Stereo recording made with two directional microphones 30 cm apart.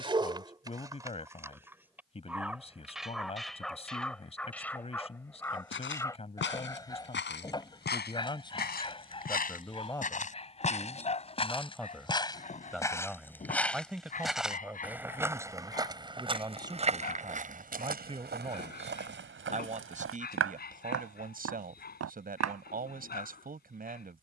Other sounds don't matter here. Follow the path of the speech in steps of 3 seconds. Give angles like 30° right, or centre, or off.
20° left, 20° left, 20° left, 10° left, centre, 10° right, 20° right, 30° right.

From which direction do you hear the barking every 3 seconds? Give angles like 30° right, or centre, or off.
10° right, centre, 10° left, 20° left, 30° left, 30° left, 30° left, 30° left.